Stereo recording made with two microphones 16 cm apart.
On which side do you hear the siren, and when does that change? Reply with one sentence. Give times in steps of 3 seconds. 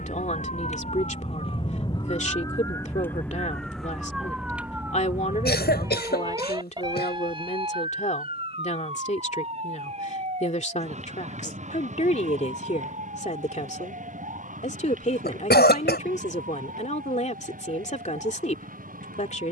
You can hear the siren on the left from 0 s, in the centre from 3 s and on the right from 6 s.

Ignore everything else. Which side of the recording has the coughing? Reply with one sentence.
You can hear the coughing on the left.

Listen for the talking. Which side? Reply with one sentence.
In this clip you hear the talking on the left.